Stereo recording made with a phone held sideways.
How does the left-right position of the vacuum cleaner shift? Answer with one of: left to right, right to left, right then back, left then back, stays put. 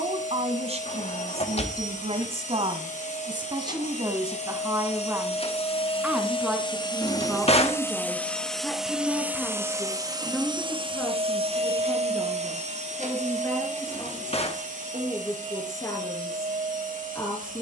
left to right.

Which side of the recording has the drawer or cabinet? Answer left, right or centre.
left.